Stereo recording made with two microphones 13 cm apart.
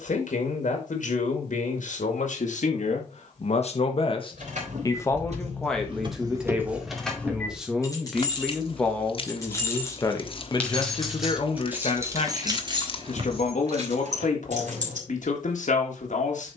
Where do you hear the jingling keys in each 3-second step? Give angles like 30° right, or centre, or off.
off, 70° right, 10° left, 10° left, 50° right, off.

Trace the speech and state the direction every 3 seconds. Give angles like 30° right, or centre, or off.
80° left, 30° left, centre, 30° left, 70° left, 80° left.